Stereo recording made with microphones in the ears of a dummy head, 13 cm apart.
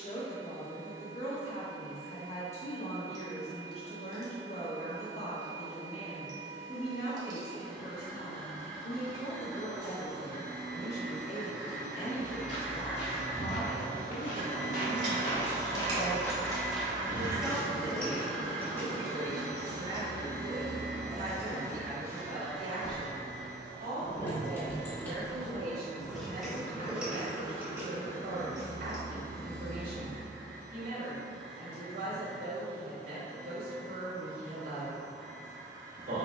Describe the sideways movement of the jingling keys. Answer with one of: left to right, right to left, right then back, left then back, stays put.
left then back.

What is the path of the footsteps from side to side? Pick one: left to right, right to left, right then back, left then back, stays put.
left to right.